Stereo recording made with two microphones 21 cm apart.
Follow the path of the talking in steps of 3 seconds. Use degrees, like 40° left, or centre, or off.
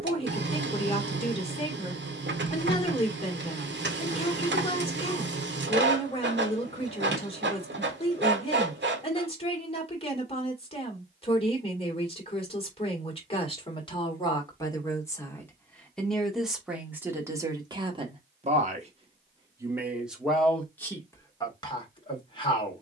30° left, 30° left, 30° left, 30° left, 20° left, centre, 10° right, 20° left.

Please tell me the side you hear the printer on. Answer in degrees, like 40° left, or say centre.
60° right.